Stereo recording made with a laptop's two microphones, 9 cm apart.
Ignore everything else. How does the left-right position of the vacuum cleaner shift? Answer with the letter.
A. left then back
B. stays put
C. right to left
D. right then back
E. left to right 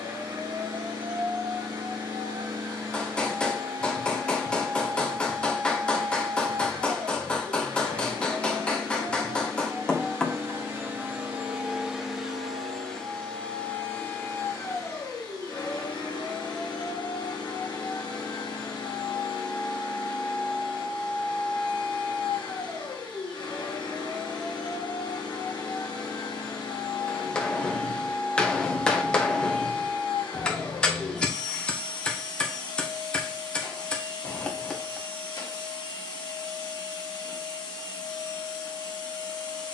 C.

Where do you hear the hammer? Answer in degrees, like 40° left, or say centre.
10° left.